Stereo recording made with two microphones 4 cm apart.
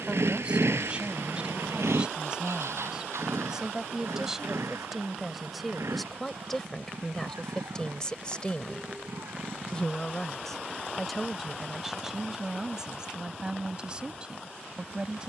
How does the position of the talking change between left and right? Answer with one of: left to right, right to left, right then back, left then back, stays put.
left then back.